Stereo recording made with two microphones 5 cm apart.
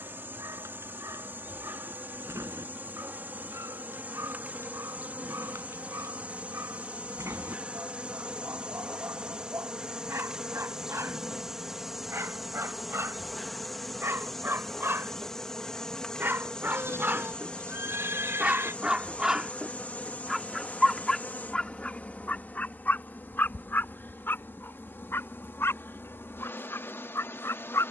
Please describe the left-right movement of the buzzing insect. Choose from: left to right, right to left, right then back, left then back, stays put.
right to left.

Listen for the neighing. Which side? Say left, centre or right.
right.